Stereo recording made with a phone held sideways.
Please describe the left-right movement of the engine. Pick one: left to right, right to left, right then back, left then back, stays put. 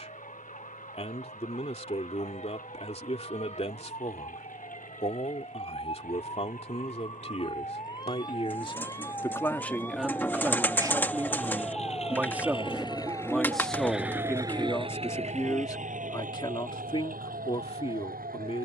left to right.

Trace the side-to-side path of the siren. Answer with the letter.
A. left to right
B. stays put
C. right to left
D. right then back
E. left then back
A.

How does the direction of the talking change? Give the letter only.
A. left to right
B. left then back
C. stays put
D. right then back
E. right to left
D.